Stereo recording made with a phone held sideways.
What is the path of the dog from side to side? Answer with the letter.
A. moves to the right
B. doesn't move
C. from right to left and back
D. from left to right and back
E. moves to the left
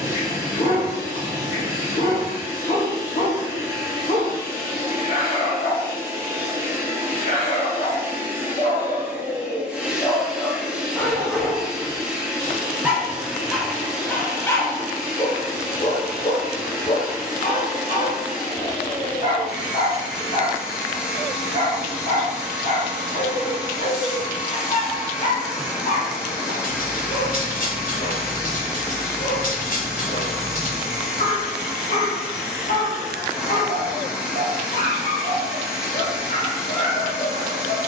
D.